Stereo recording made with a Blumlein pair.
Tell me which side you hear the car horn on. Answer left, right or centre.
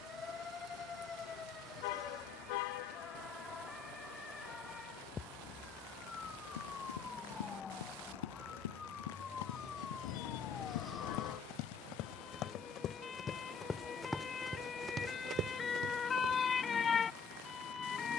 left.